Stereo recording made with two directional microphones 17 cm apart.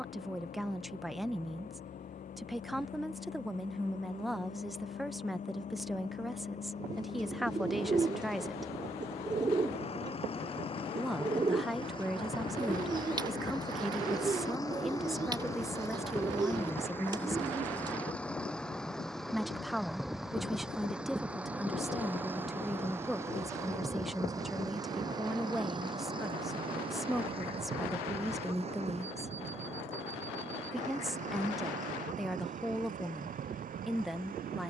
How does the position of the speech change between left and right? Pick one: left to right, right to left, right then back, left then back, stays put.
stays put.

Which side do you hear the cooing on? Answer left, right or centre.
right.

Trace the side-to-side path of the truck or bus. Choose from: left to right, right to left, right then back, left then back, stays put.
left to right.